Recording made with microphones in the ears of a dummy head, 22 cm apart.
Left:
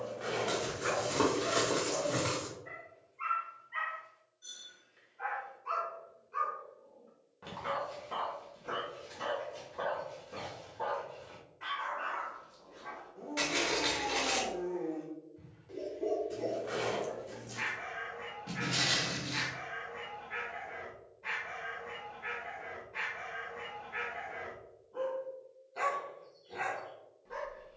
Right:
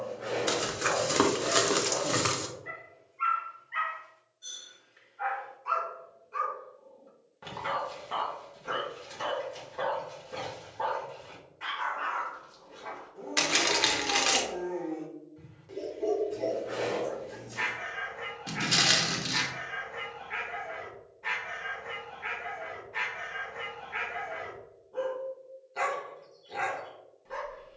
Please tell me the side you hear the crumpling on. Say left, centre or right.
right.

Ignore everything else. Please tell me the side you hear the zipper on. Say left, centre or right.
left.